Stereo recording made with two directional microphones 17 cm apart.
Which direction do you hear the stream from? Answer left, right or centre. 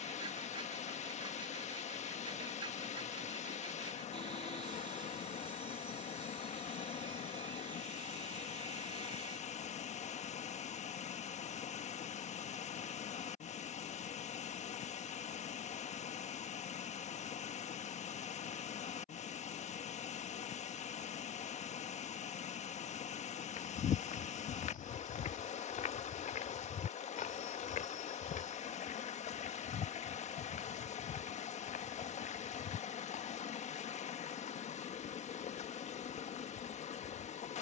left.